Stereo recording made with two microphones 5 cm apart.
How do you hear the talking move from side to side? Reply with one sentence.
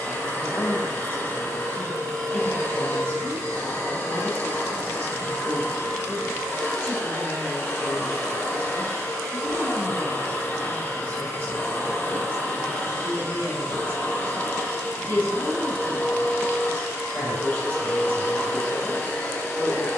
In this clip you hear the talking stay put.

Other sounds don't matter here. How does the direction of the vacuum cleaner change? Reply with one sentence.
You can hear the vacuum cleaner stay put.